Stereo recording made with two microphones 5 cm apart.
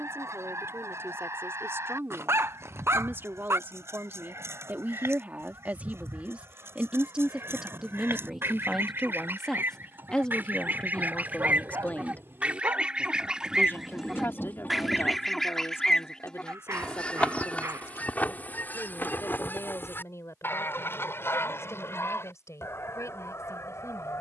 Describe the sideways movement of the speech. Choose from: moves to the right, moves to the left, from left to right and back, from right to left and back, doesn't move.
moves to the left.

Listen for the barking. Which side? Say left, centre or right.
right.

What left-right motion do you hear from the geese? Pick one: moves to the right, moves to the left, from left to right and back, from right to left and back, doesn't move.
moves to the left.